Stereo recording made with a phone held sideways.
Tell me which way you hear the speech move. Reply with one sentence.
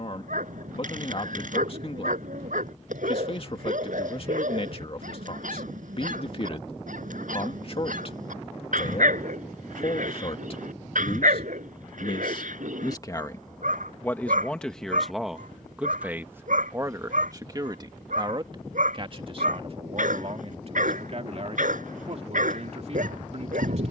In this clip you hear the speech go from the left side to the right.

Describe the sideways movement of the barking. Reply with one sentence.
In this clip you hear the barking stay put.